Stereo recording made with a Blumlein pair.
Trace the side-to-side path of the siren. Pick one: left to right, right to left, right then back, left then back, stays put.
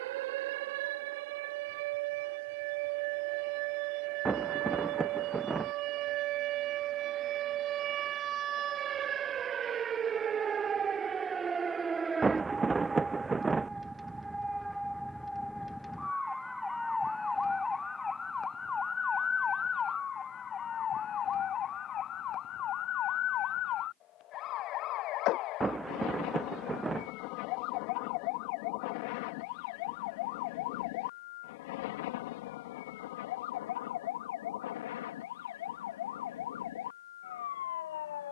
right to left.